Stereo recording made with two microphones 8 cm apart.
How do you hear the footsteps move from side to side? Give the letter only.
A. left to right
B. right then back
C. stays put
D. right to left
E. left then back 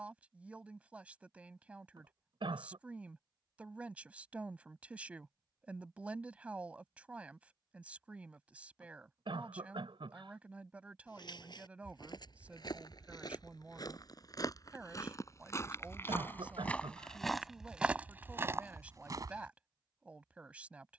A.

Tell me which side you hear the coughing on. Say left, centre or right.
right.